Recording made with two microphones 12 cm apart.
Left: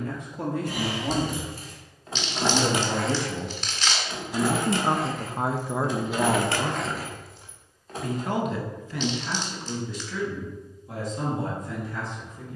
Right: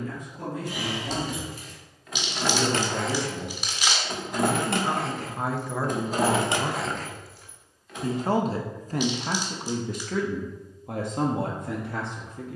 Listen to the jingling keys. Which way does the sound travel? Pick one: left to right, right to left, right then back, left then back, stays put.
right then back.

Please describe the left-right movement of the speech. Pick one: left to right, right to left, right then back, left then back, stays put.
left to right.